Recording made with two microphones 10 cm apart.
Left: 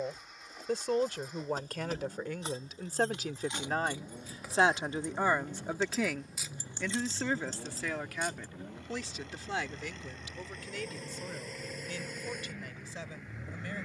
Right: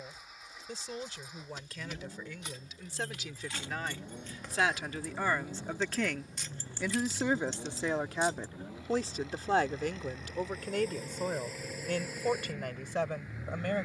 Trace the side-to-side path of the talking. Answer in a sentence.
In this clip you hear the talking travel towards the right.